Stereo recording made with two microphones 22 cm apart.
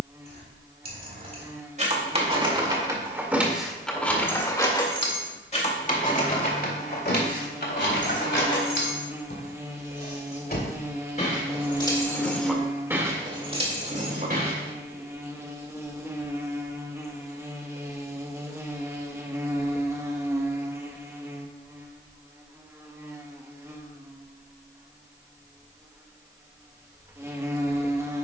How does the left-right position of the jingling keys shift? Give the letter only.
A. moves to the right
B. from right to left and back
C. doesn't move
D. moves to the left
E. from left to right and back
B.